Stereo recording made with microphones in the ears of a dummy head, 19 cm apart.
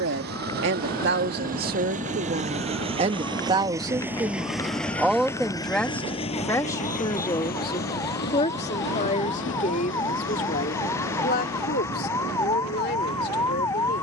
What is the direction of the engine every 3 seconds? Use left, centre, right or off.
right, centre, left, left, left.